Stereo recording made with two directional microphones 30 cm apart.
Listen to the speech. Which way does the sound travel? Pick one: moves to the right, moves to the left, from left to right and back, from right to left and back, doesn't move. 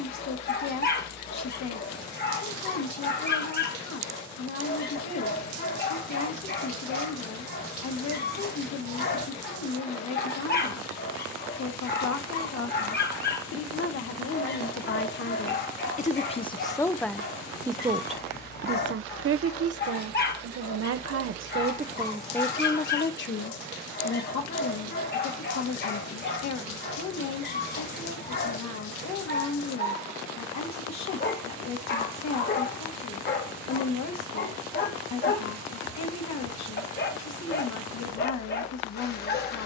from left to right and back.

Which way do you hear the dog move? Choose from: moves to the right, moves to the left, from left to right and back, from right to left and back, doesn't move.
doesn't move.